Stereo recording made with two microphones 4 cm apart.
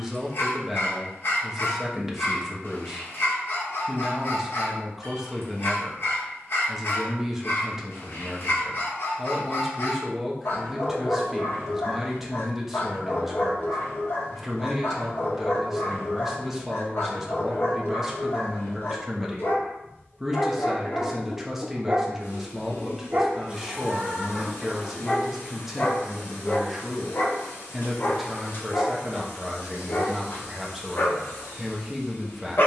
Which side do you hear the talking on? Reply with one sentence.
In this clip you hear the talking in the centre.